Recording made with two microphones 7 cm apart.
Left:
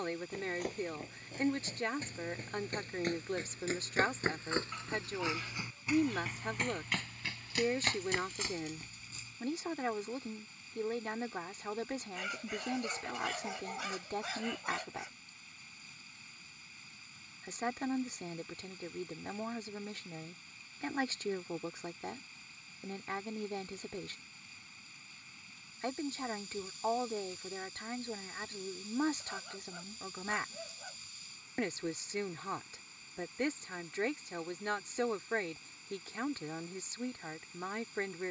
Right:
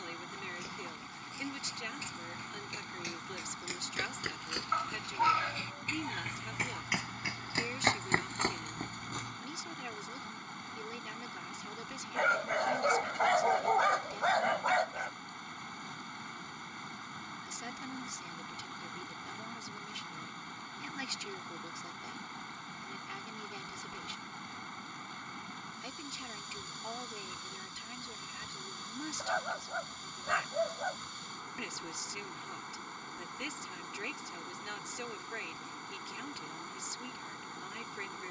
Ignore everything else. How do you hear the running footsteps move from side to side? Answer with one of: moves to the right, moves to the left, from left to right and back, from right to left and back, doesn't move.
moves to the right.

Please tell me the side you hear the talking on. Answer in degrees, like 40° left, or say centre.
40° left.